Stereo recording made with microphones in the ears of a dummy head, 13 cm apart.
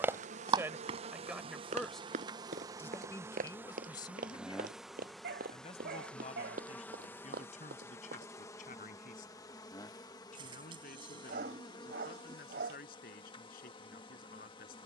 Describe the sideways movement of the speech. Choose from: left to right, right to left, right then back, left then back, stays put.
right to left.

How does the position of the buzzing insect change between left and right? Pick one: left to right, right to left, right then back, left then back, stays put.
right to left.